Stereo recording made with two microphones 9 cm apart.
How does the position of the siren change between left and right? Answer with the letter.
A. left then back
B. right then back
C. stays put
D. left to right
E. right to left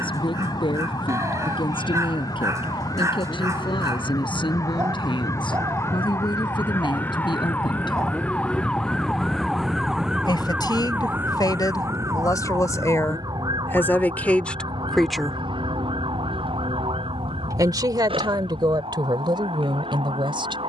D.